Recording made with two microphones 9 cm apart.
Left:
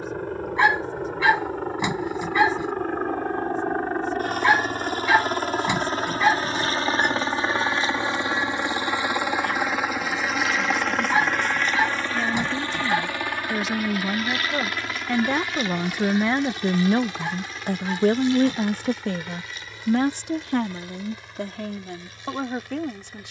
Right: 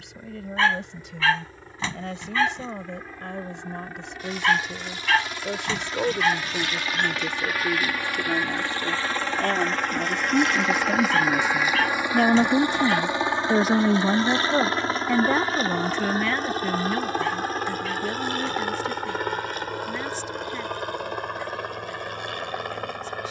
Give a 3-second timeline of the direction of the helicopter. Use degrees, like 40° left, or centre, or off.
60° left, 50° left, 30° left, centre, 20° right, 40° right, 50° right, 60° right.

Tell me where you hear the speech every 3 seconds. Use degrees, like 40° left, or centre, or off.
80° right, 80° right, 70° right, 70° right, 40° right, 20° left, 60° left, 70° left.